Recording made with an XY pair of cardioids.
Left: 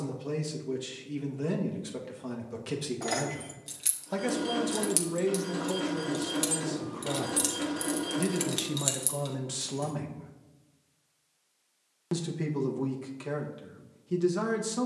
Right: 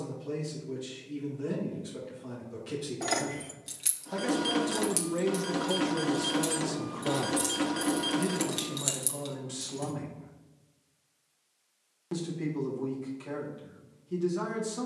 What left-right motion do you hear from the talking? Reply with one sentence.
In this clip you hear the talking go right and come back.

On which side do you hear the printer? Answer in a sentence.
In this clip you hear the printer on the right.